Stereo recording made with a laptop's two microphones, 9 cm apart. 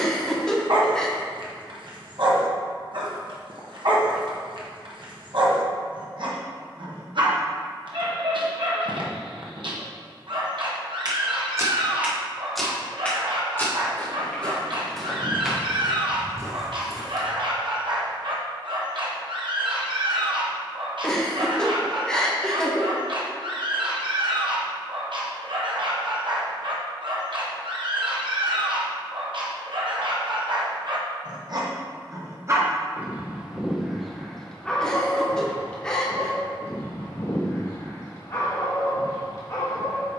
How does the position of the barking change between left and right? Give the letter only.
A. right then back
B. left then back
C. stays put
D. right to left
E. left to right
D.